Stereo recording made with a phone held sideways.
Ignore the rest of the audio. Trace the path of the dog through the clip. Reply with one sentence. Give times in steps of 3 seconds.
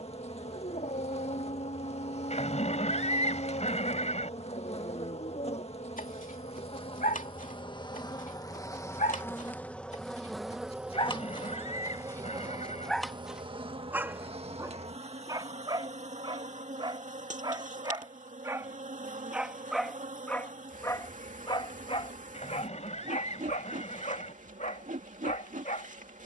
You can hear the dog on the left from 0 s, in the centre from 12 s, on the right from 15 s, in the centre from 18 s and on the left from 21 s.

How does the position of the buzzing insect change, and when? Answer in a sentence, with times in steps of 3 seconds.
In this clip you hear the buzzing insect on the left from 0 s, in the centre from 9 s and on the right from 12 s.